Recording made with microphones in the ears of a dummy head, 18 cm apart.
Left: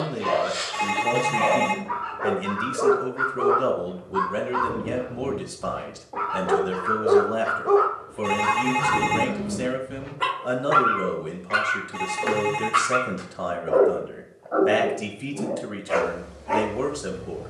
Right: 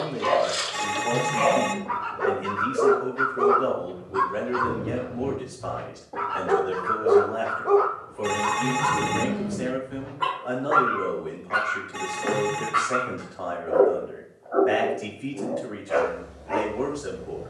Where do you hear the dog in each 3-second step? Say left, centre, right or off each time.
right, right, centre, left, left, left.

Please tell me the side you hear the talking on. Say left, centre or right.
left.